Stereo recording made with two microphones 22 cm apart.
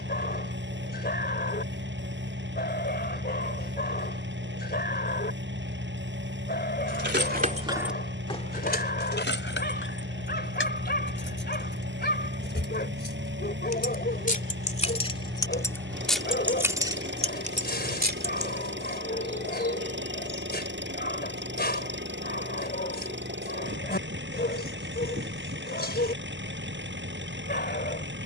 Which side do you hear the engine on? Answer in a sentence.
You can hear the engine on the right.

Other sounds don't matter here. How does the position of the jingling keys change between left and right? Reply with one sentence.
In this clip you hear the jingling keys go left and come back.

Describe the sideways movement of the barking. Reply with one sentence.
You can hear the barking stay in one place.